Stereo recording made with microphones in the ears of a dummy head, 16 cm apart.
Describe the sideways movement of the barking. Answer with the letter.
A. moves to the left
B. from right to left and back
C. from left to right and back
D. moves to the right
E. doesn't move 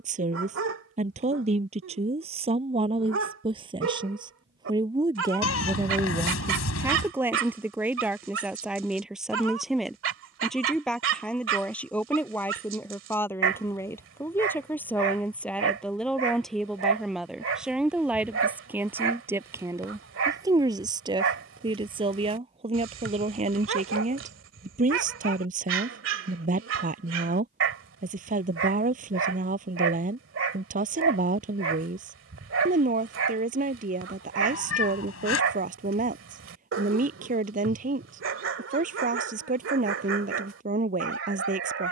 E.